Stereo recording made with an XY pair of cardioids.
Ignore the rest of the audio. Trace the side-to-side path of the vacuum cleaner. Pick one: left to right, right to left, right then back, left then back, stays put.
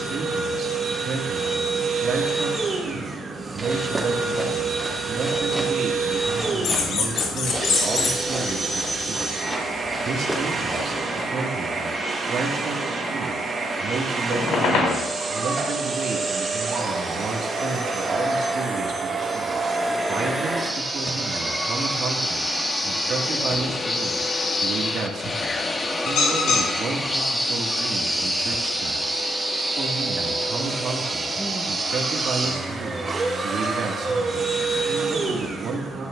left then back.